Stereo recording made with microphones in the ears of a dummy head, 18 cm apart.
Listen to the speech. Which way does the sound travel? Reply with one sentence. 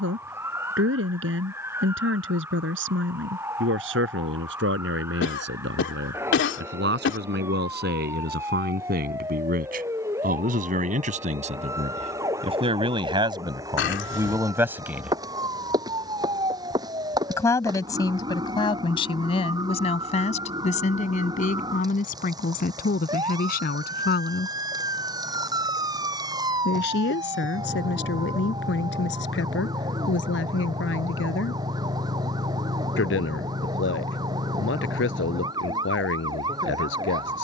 In this clip you hear the speech travel towards the left.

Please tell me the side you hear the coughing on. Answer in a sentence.
In this clip you hear the coughing on the left.